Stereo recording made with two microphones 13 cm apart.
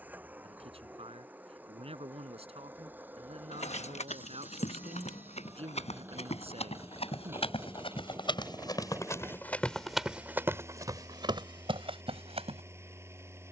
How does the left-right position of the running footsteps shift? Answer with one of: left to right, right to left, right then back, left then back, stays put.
left to right.